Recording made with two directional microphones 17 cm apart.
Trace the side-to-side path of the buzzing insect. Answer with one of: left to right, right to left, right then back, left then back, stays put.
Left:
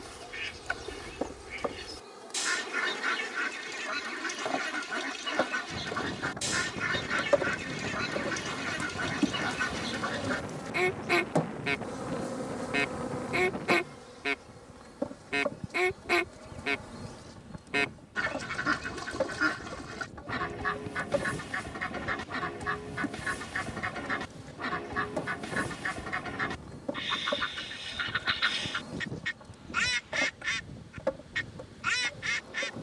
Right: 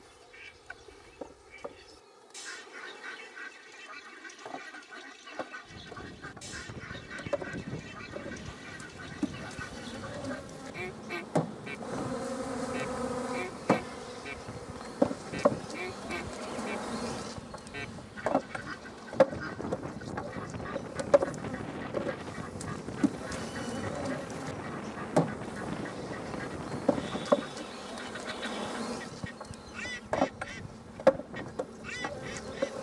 left to right.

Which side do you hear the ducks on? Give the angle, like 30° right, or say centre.
70° left.